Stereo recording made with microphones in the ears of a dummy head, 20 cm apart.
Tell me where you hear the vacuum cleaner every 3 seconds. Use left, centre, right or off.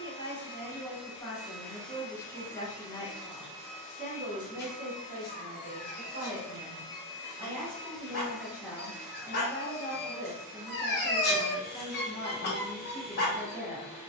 centre, left, centre, centre, centre.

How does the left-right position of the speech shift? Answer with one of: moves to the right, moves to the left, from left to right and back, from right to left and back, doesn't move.
from left to right and back.